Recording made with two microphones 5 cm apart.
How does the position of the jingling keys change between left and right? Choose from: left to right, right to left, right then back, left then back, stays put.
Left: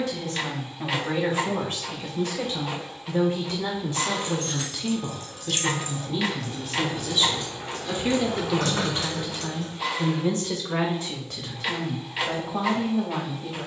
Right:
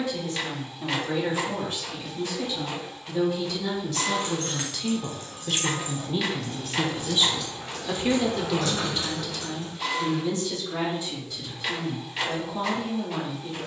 right to left.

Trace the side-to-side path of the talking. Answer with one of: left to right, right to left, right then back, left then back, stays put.
right then back.